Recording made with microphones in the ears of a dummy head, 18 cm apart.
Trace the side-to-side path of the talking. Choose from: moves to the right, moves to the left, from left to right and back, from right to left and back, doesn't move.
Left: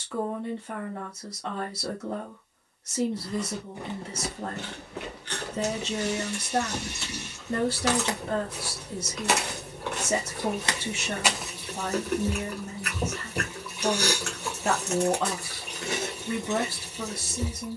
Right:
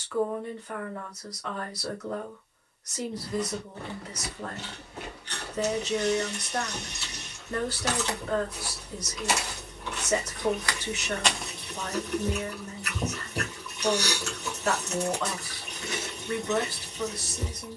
doesn't move.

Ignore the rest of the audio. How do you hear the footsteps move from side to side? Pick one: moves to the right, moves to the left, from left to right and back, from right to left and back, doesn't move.
from right to left and back.